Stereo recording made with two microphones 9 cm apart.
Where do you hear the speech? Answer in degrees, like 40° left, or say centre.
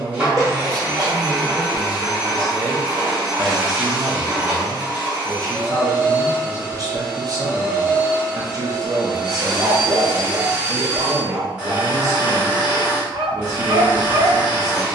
40° right.